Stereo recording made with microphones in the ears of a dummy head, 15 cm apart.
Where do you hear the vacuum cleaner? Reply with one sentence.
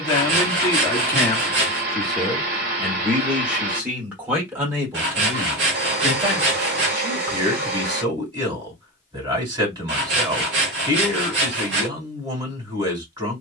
In this clip you hear the vacuum cleaner on the right.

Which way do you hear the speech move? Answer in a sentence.
You can hear the speech travel towards the right.